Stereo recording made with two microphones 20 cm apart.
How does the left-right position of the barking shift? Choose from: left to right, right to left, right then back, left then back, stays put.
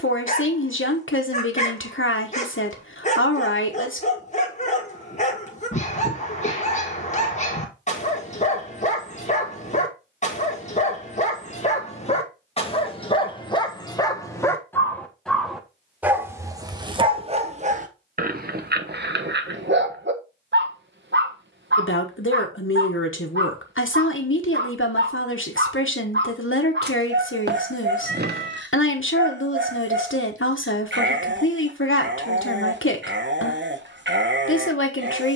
left to right.